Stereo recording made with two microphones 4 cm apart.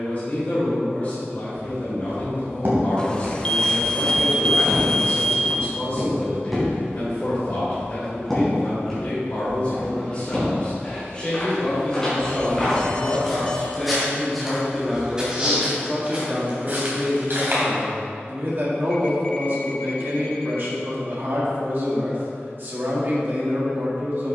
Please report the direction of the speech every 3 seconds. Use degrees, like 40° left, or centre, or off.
40° left, 40° left, 40° left, 30° left, 10° left, 30° right, 50° right, 50° right.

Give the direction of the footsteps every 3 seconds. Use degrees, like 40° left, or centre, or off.
60° right, 30° right, centre, 10° left, centre, 40° right, off, off.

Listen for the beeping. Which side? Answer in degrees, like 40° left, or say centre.
20° left.